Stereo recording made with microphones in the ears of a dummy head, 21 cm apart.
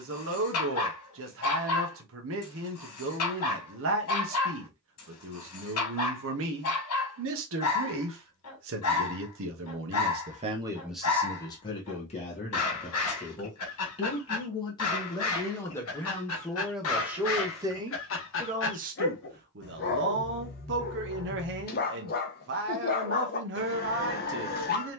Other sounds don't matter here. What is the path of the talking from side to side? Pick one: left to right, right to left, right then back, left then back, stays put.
left then back.